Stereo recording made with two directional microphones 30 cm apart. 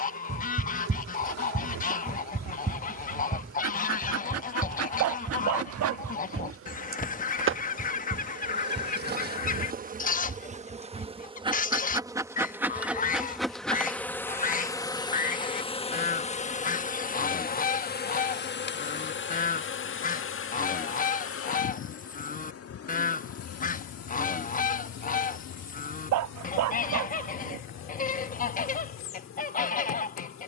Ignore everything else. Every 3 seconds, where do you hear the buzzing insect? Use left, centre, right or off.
right, right, right, right, centre, left, left, left, left, left.